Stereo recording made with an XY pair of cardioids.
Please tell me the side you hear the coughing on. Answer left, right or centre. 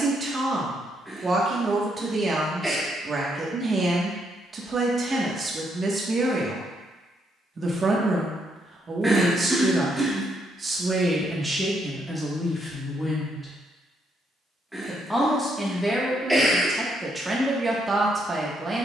centre.